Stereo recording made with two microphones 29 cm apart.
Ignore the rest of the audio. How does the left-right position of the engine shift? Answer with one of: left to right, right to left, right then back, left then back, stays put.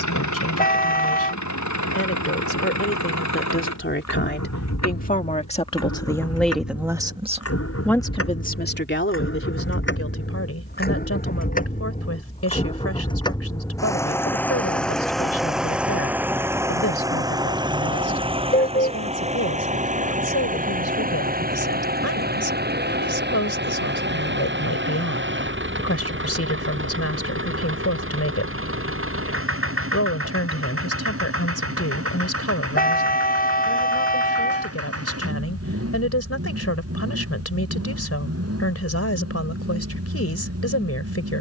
left to right.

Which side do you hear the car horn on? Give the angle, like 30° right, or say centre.
30° left.